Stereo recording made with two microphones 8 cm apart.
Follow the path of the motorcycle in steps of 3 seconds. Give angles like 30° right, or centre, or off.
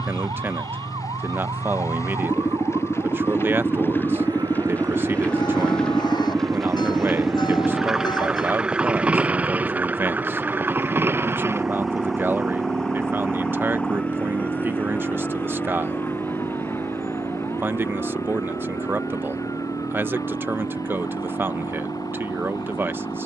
40° left, 20° left, centre, 20° right, 40° right, 50° right, 50° right, 60° right.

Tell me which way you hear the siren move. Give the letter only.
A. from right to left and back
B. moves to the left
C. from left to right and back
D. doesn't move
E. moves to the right
B.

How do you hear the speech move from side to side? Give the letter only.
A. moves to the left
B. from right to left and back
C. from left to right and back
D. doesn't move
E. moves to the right
D.